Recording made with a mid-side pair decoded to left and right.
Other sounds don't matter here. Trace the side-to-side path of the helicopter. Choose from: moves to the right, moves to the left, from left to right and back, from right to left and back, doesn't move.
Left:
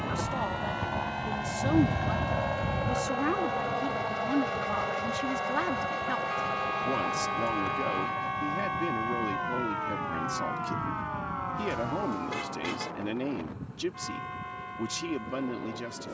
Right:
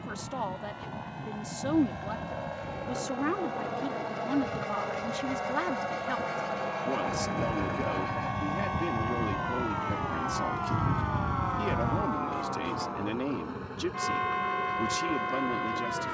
moves to the right.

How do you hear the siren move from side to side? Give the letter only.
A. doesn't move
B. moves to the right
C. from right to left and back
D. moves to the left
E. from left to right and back
B.